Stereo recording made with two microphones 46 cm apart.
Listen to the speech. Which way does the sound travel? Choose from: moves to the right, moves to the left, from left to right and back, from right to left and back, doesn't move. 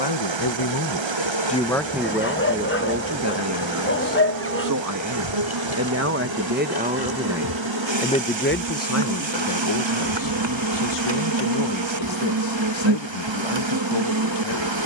from left to right and back.